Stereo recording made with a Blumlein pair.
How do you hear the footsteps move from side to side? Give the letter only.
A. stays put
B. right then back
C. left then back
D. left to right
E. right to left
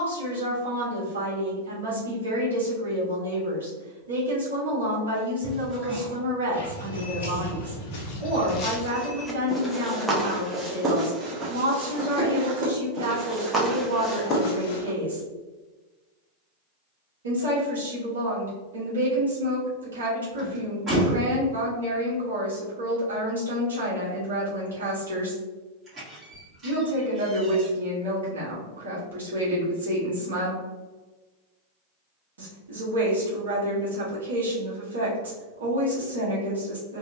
B.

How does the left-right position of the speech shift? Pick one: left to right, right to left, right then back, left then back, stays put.
stays put.